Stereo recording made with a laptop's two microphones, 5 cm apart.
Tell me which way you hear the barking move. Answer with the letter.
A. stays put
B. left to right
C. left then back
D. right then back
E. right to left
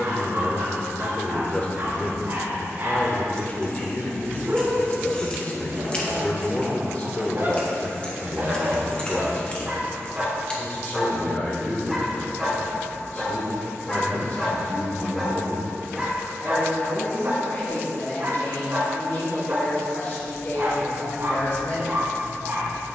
C.